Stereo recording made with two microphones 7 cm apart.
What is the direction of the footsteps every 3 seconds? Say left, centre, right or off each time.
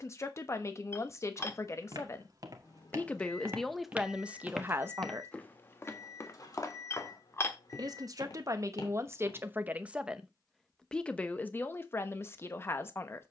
right, centre, left, left, off.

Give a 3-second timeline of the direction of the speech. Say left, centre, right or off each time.
left, centre, right, centre, left.